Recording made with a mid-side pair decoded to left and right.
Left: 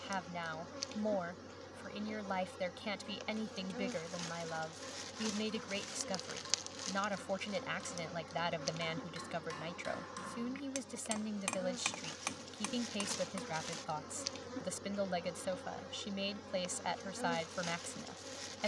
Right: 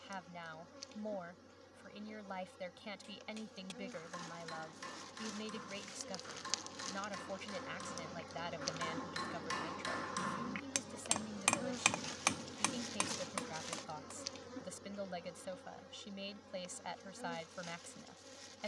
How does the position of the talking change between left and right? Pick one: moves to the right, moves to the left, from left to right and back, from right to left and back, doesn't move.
doesn't move.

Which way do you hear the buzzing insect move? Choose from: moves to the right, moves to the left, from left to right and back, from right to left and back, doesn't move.
from left to right and back.